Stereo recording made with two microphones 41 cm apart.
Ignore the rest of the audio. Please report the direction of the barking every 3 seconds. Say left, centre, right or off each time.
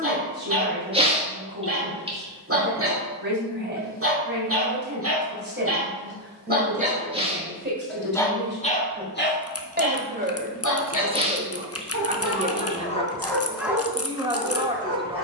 right, right, centre, left, centre.